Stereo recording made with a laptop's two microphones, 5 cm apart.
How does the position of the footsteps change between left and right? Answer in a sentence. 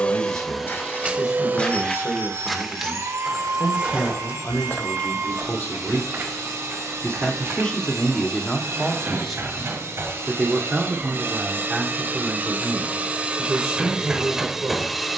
You can hear the footsteps move from left to right.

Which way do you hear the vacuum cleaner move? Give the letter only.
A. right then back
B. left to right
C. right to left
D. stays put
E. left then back
A.